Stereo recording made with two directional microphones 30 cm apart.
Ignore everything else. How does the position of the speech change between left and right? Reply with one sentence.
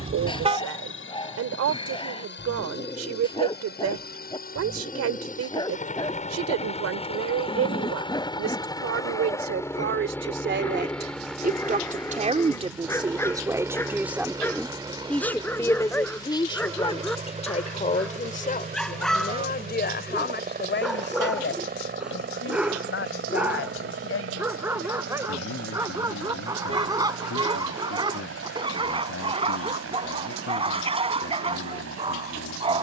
You can hear the speech move to the left.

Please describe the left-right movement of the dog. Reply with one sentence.
In this clip you hear the dog travel towards the right.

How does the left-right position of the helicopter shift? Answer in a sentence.
You can hear the helicopter move from left to right.